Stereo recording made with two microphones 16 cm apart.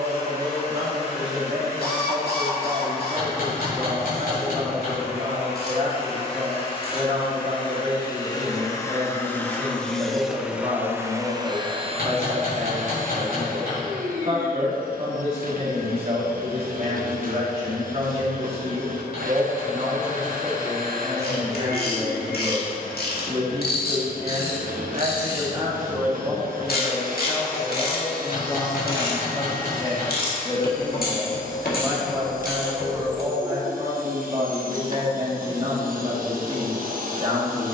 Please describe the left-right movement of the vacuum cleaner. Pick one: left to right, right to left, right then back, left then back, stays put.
left to right.